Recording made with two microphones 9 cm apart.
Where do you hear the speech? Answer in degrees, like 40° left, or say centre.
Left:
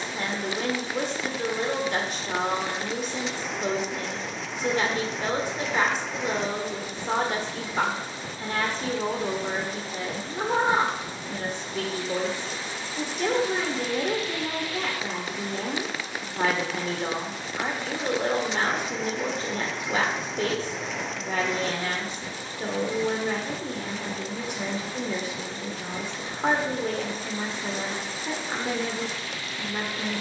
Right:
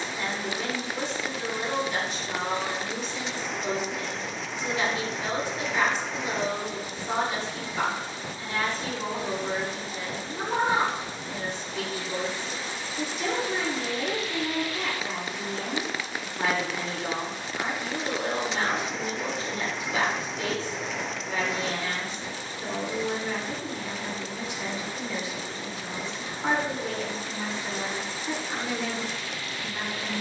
50° left.